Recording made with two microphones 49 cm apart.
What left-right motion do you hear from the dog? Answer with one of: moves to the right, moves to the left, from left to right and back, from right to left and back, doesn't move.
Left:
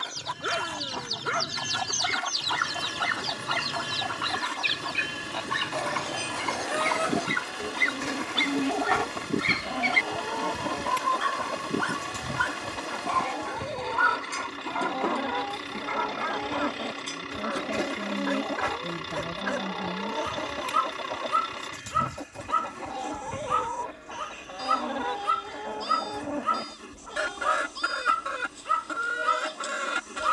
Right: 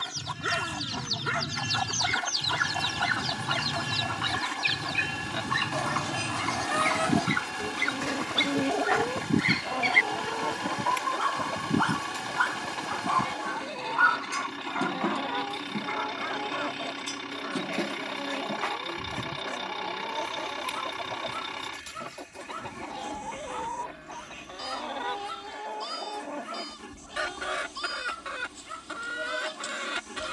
moves to the left.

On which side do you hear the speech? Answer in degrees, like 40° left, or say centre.
60° left.